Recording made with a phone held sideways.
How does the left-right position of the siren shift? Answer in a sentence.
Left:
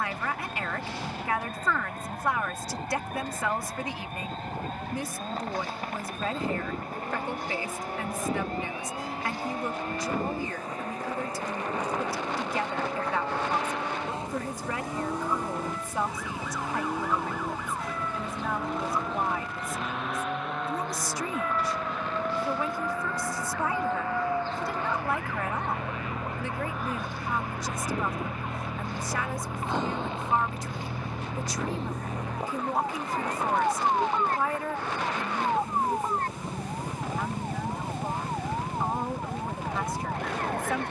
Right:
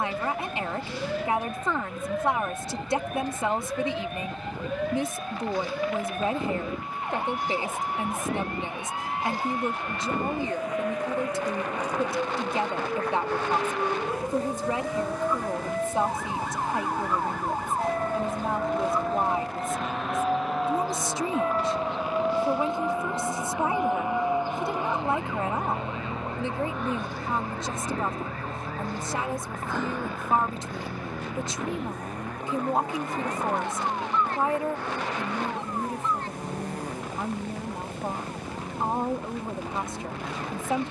You can hear the siren go from the right side to the left.